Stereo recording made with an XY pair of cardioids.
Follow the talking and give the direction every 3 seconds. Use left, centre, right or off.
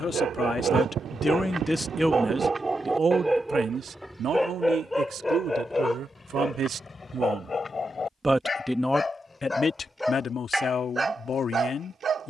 centre, right, right, left.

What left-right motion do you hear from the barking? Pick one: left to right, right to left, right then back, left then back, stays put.
left then back.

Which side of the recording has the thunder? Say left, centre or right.
right.